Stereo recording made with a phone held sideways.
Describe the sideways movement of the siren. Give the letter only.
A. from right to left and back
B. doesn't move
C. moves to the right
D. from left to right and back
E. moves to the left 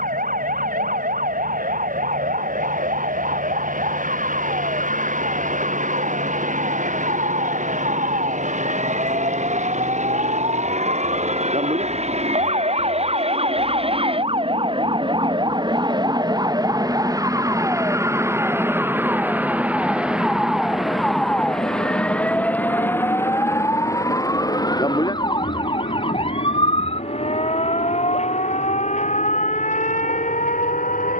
E.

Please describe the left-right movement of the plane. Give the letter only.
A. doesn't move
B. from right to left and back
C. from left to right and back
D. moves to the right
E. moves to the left
E.